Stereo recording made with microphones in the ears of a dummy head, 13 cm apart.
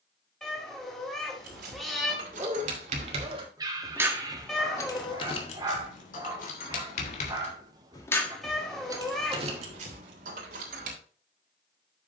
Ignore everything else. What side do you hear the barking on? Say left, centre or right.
right.